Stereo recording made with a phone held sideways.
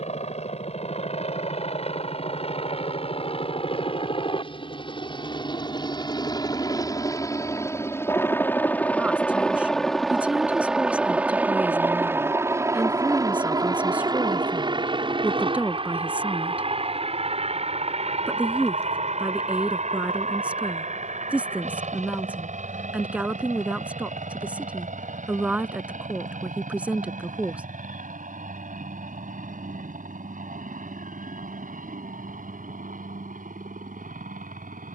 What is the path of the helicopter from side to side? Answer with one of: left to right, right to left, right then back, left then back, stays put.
left to right.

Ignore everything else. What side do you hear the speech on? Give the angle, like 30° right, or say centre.
10° right.